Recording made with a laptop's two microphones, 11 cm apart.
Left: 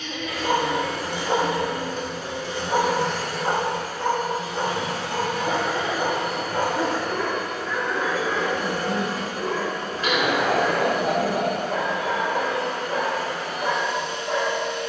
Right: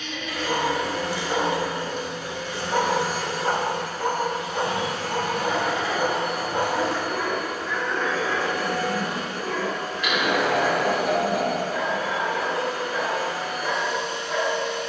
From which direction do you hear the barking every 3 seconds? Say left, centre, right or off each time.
left, centre, centre, left, left.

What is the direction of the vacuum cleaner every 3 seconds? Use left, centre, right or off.
left, right, centre, left, left.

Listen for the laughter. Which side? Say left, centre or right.
left.